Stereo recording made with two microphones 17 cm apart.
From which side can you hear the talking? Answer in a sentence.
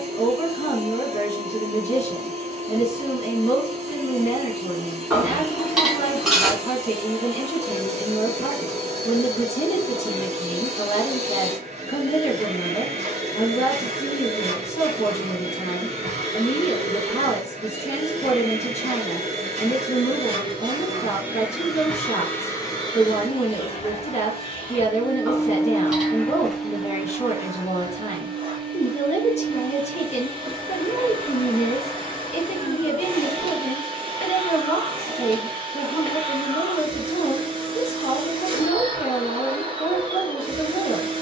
You can hear the talking on the left.